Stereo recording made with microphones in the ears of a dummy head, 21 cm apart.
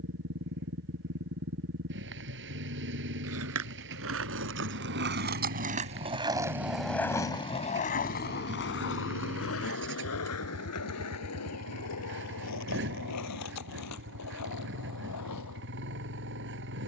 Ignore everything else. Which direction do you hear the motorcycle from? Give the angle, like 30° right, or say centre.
50° right.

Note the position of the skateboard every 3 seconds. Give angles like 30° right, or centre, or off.
off, 50° right, 20° left, 70° left, 80° left, 80° left.